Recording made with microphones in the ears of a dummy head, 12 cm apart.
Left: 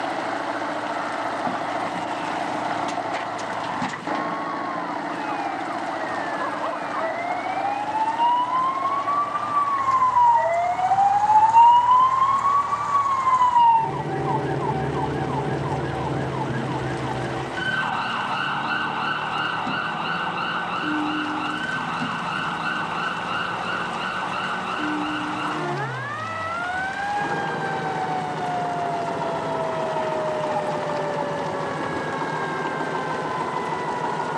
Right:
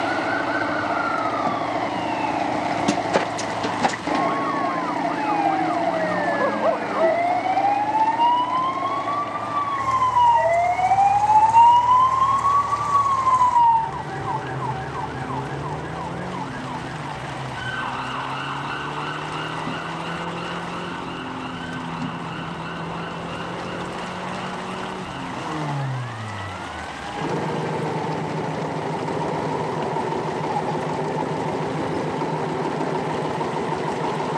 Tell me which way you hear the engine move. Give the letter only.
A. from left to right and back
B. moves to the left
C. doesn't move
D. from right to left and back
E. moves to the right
C.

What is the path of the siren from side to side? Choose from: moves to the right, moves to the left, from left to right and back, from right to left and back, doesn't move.
moves to the left.